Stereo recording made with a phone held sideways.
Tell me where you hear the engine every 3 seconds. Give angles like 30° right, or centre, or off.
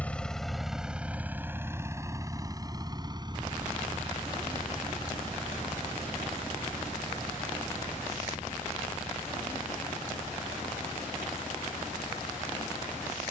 10° right, 40° right, 50° right, 50° right, 50° right.